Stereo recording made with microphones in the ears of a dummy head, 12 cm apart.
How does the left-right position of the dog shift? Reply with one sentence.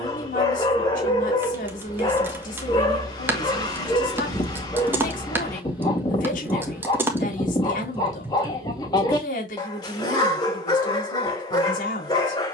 You can hear the dog stay in one place.